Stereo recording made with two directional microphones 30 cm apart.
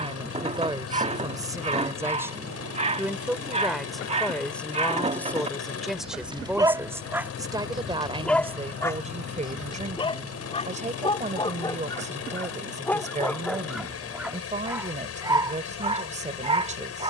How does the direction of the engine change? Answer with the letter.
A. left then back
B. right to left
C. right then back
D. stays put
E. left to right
D.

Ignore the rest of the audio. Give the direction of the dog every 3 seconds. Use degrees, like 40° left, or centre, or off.
20° right, 20° right, centre, 20° left, centre, 20° right.